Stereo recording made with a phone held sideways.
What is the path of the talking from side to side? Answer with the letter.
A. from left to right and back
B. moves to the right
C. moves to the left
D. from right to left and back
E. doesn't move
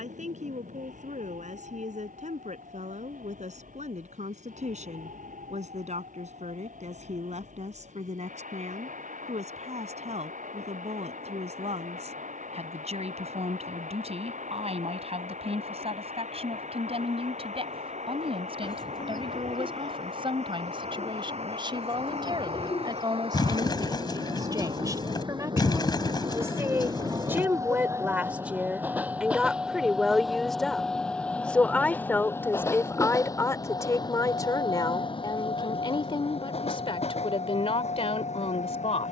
C.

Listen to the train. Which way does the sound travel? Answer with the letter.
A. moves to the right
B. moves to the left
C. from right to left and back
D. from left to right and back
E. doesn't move
B.